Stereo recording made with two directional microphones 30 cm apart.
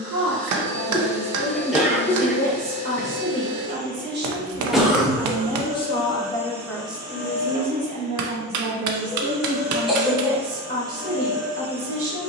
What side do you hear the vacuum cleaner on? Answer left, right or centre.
right.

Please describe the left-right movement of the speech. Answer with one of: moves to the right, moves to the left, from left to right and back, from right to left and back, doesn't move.
from right to left and back.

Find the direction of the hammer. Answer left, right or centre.
right.